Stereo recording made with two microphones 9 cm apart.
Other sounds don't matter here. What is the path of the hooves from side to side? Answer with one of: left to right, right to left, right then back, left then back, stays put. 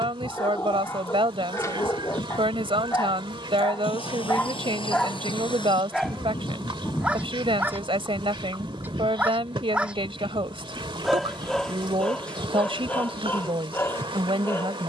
left to right.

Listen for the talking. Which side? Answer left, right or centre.
right.